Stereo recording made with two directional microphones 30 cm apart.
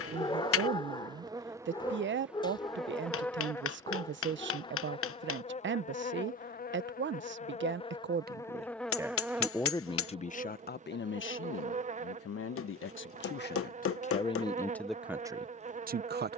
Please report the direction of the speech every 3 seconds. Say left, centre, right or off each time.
right, right, right, left, left, right.